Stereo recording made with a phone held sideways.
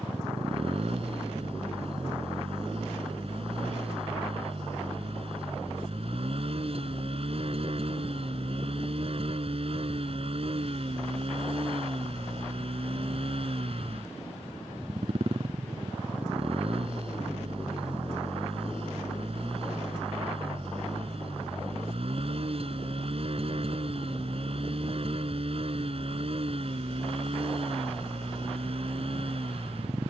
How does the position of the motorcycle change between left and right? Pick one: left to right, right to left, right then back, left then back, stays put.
stays put.